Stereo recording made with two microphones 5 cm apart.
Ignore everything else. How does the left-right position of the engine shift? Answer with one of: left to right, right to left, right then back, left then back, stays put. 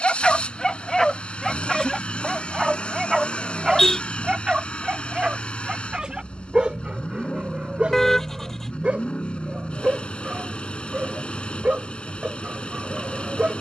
stays put.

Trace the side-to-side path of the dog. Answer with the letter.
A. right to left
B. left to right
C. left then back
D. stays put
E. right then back
B.